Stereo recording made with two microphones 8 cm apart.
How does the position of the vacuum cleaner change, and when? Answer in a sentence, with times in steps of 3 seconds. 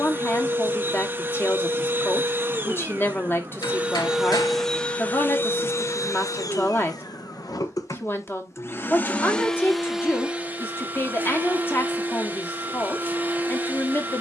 You can hear the vacuum cleaner on the right from 0 s, in the centre from 3 s, on the left from 6 s, in the centre from 9 s and on the right from 12 s.